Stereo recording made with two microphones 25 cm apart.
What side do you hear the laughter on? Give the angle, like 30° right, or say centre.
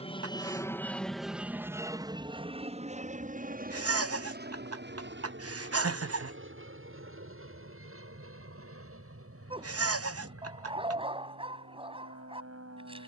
60° right.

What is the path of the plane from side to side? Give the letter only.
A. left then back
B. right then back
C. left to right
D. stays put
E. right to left
C.